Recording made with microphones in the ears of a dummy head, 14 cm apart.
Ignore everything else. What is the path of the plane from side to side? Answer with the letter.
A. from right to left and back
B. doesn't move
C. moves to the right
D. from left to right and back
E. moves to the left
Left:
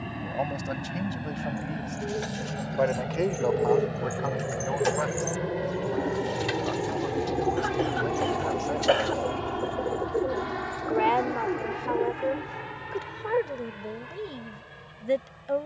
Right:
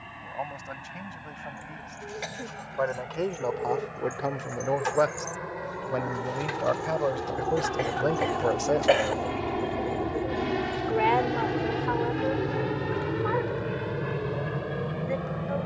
C.